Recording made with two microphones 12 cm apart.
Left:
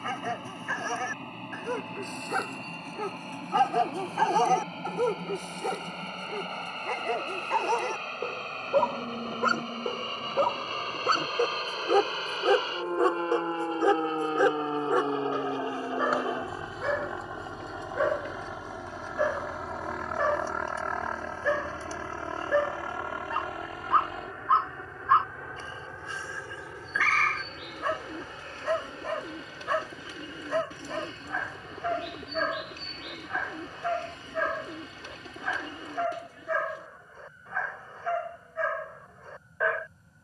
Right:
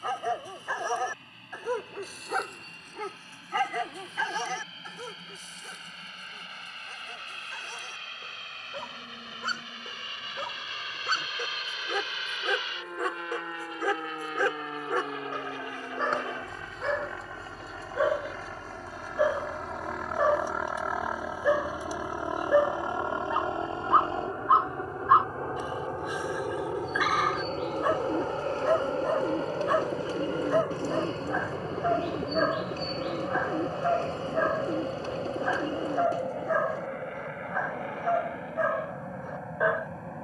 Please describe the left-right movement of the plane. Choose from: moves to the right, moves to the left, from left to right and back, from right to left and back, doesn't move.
moves to the right.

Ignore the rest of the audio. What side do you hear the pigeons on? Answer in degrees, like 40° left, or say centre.
40° right.